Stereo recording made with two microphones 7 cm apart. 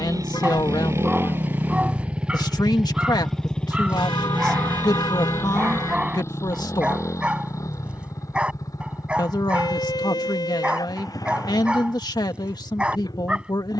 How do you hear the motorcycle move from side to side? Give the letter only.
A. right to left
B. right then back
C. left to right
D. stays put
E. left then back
A.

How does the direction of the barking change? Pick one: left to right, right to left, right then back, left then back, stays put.
stays put.